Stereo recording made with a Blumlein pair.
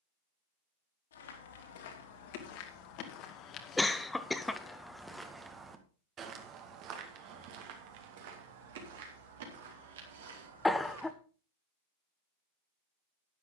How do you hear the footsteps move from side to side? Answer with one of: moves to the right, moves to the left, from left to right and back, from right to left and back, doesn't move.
moves to the right.